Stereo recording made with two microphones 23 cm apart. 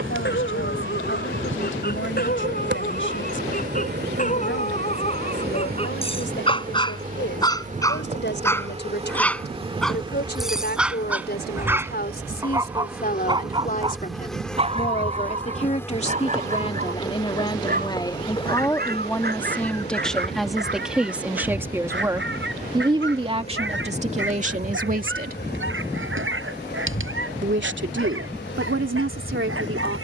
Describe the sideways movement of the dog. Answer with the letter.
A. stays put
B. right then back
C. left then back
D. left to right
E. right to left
D.